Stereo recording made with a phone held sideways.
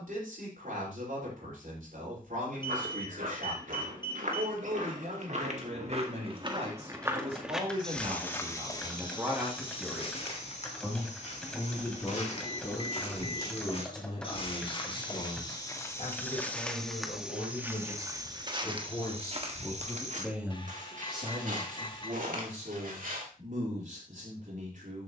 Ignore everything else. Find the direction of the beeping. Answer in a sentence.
You can hear the beeping on the left.